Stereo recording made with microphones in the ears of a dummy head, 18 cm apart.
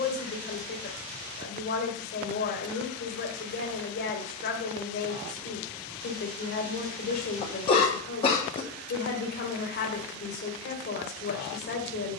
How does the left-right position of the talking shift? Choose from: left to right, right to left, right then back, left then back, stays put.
stays put.